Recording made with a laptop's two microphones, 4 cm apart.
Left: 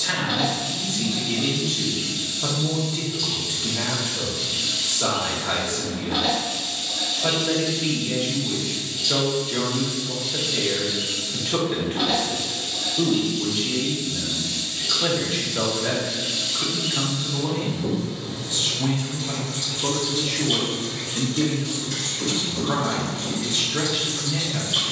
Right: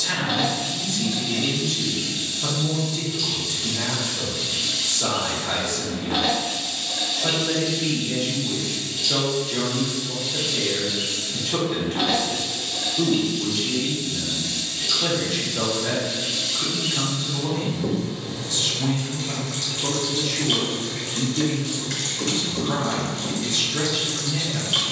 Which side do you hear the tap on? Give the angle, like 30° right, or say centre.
60° right.